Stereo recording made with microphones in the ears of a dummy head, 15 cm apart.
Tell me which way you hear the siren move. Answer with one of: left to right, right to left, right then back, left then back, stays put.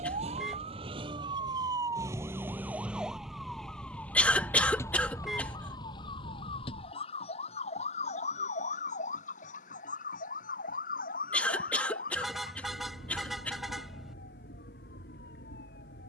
right to left.